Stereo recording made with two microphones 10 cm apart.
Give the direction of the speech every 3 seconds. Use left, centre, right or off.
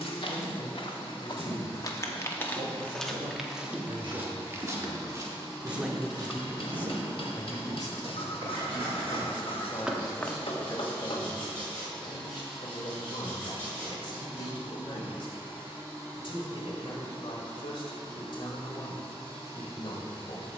right, right, left, left, left, left, left.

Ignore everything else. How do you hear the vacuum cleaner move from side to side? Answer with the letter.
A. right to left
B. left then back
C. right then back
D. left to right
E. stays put
D.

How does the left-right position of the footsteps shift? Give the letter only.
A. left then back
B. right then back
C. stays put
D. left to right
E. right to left
B.